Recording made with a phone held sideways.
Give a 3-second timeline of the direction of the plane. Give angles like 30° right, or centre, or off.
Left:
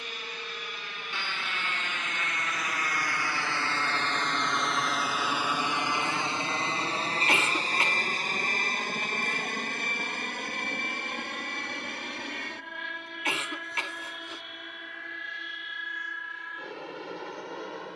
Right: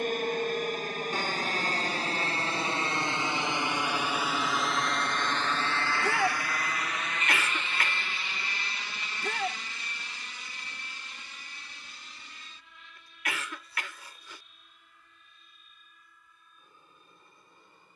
40° right, centre, 30° left, 60° left, 70° left, 70° left.